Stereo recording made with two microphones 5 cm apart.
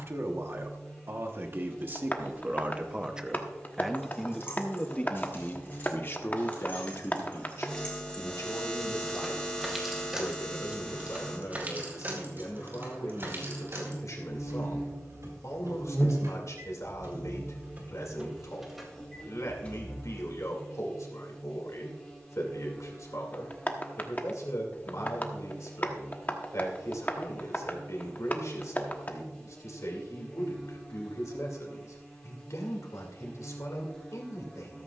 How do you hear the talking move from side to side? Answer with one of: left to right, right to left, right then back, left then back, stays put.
right to left.